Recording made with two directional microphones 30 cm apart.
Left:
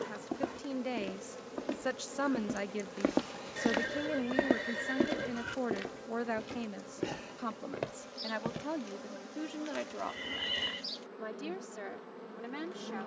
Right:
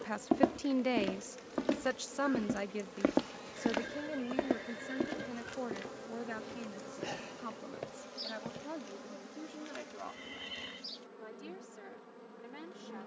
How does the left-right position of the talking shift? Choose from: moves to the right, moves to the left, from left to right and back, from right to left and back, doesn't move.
moves to the left.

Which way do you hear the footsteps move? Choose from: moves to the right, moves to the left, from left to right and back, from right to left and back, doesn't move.
moves to the left.